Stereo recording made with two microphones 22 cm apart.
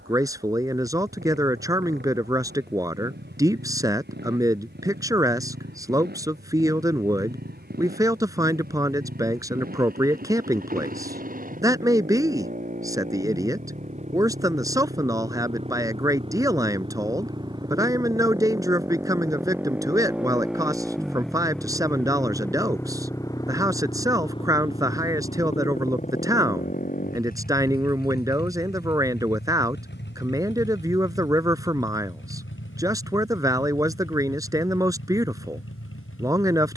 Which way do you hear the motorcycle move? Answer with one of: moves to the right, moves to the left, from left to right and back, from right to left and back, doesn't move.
moves to the left.